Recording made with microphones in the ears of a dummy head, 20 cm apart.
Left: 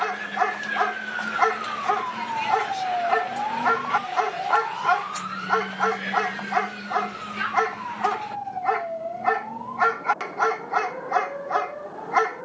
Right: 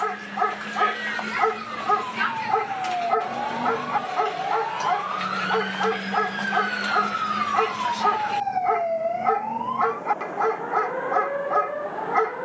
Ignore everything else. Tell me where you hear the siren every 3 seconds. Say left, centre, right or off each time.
left, centre, right, right.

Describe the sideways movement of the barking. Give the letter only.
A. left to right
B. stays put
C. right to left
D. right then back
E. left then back
B.